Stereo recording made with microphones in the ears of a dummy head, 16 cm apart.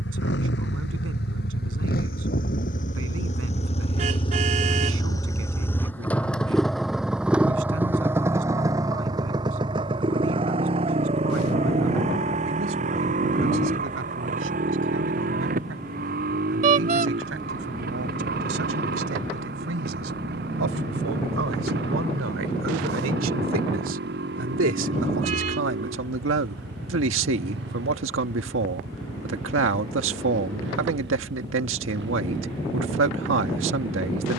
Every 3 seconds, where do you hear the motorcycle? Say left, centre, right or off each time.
left, left, centre, right, right, right, right, right, right, right, right, off.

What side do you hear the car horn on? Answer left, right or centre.
right.